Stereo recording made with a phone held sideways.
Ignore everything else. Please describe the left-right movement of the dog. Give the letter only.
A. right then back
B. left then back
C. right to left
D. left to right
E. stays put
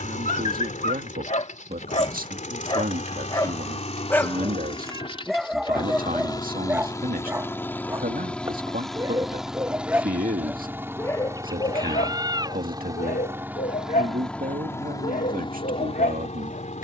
A.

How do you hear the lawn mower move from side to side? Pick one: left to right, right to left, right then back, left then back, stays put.
right then back.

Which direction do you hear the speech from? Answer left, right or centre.
right.